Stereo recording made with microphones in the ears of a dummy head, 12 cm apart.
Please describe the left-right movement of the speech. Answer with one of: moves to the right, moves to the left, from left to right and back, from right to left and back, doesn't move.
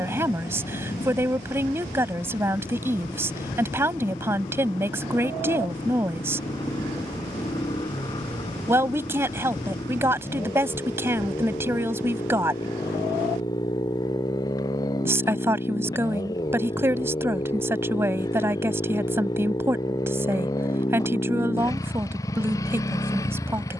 doesn't move.